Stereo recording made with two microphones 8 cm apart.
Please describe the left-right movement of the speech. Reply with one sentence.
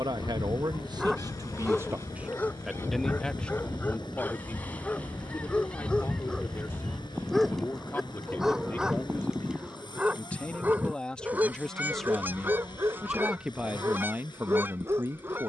You can hear the speech go left and come back.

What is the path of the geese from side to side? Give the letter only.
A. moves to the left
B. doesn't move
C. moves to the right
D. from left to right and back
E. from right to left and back
C.